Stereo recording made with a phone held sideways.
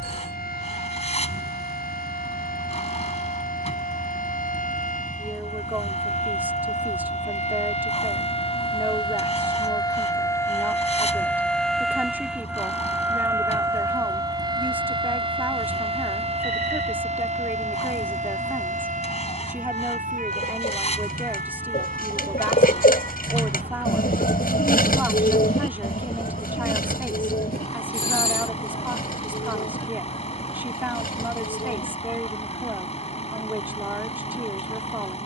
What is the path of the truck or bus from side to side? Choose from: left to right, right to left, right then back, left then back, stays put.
stays put.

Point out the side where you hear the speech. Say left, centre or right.
centre.